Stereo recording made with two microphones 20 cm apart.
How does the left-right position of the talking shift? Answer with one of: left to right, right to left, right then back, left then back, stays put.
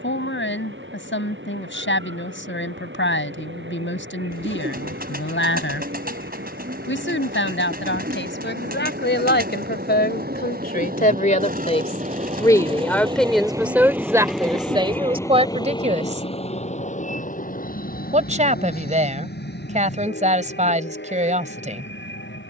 left to right.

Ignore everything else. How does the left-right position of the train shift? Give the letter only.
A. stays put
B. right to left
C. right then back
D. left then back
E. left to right
B.